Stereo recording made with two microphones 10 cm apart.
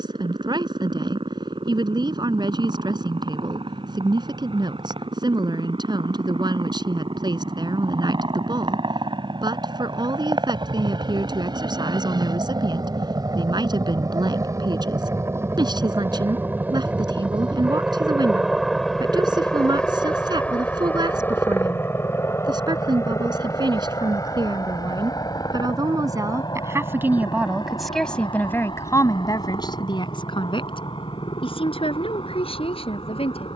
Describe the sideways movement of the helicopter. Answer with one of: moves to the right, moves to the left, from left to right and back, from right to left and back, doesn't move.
moves to the left.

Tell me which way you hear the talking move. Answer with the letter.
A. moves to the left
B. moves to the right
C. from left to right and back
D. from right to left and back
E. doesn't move
A.